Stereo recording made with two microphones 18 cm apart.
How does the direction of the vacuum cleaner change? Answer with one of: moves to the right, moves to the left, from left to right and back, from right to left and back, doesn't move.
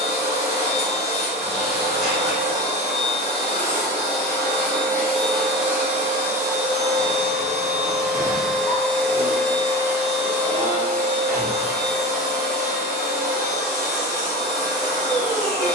from left to right and back.